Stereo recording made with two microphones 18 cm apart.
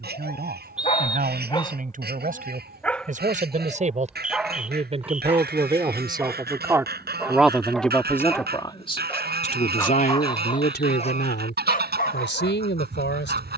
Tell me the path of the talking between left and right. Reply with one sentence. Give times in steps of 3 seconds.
In this clip you hear the talking on the right from 0 s, in the centre from 6 s and on the left from 9 s.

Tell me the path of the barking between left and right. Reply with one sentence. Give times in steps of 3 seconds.
In this clip you hear the barking on the left from 0 s, in the centre from 3 s and on the left from 9 s.